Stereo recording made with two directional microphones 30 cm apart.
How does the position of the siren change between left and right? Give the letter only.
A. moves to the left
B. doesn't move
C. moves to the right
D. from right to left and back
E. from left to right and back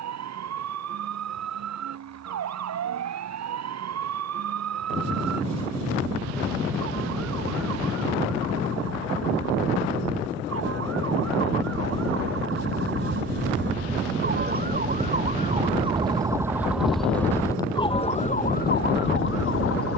A.